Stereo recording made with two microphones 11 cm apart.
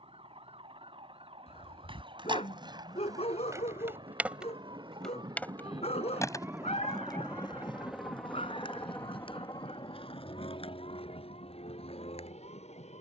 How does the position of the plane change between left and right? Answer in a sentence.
You can hear the plane travel towards the left.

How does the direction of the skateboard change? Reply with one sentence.
In this clip you hear the skateboard go from the right side to the left.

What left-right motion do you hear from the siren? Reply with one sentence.
You can hear the siren move to the left.